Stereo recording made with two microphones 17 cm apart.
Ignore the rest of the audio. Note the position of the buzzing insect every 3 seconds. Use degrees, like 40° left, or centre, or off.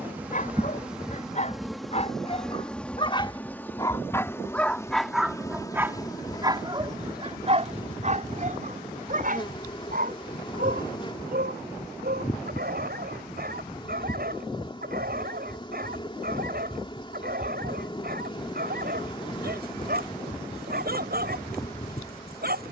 centre, 20° left, 30° left, 30° left, 30° left, 30° left, 30° left, 30° left.